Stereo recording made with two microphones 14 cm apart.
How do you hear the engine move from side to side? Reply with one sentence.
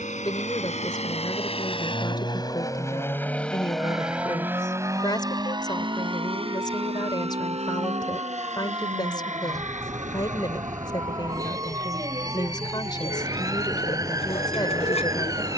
In this clip you hear the engine go from the left side to the right.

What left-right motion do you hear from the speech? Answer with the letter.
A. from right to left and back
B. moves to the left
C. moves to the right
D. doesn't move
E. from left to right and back
D.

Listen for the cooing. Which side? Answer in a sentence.
In this clip you hear the cooing on the left.